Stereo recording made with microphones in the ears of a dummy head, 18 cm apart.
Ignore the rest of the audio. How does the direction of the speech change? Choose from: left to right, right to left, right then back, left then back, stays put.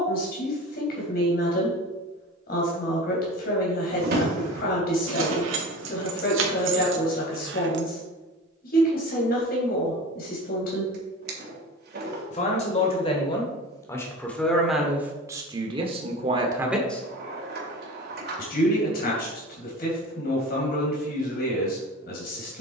right then back.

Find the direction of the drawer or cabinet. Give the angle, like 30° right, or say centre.
50° right.